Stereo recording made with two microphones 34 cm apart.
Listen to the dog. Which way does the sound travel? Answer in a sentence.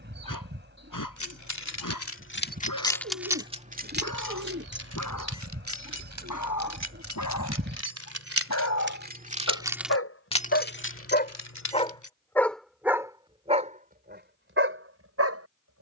You can hear the dog travel towards the right.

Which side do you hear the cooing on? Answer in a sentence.
You can hear the cooing on the right.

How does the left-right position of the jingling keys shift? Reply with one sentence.
In this clip you hear the jingling keys go right and come back.